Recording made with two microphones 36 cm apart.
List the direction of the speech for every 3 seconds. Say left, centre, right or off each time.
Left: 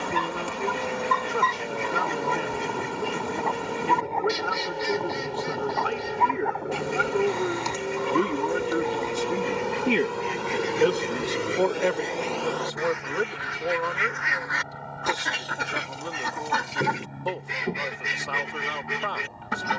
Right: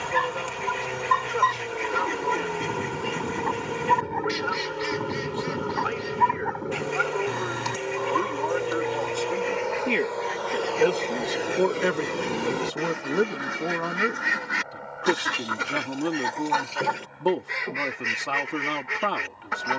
left, left, left, centre, right, right, right.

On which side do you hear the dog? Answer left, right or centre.
right.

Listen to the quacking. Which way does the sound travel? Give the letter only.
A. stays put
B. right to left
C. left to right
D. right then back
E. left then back
D.